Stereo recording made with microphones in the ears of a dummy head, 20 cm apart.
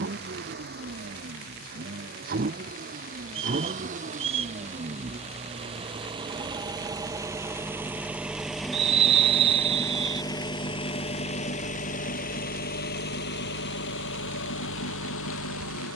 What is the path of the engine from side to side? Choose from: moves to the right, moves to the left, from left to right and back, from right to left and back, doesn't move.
moves to the left.